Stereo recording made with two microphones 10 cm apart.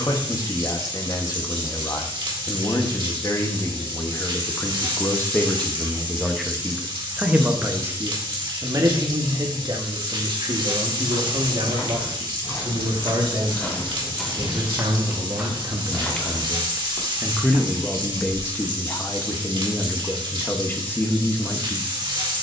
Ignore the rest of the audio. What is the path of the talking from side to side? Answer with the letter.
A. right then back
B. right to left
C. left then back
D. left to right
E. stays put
A.